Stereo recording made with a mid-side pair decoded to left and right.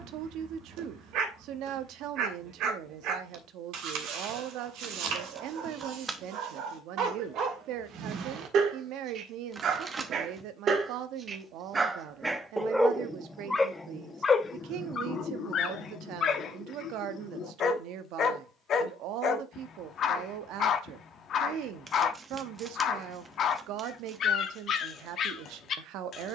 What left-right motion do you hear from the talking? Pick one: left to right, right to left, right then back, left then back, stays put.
stays put.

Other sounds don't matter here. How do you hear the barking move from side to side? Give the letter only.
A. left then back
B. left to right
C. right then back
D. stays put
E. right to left
E.